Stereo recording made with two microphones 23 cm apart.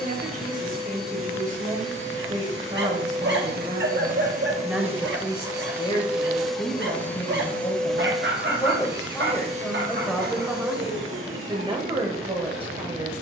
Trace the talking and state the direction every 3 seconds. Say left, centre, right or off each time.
right, centre, left, centre, right.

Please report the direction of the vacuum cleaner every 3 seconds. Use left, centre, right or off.
right, right, centre, right, right.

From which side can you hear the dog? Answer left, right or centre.
right.